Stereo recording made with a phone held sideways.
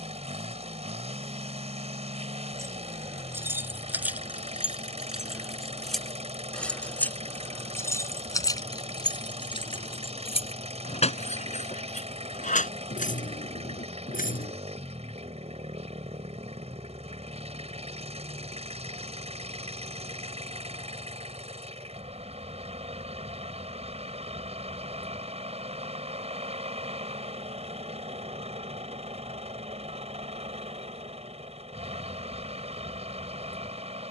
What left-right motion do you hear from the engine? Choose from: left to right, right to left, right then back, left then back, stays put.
stays put.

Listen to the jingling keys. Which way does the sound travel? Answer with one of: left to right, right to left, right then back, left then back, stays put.
right to left.